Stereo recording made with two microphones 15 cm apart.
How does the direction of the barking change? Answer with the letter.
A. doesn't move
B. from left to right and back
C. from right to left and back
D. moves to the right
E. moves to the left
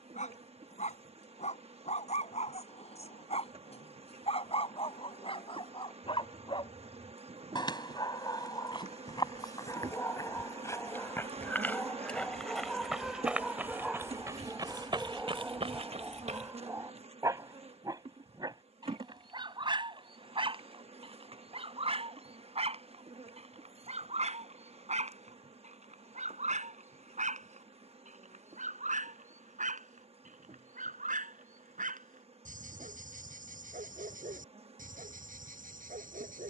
D.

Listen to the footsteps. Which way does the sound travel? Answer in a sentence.
In this clip you hear the footsteps travel towards the right.